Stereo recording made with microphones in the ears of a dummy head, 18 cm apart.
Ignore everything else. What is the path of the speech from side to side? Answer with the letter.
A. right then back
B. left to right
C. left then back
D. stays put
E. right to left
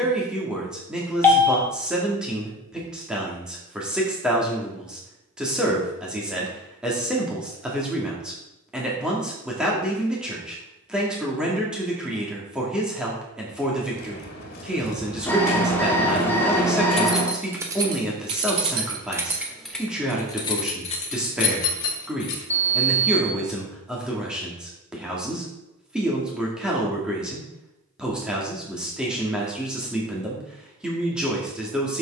D.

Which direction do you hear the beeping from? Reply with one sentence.
You can hear the beeping in the centre.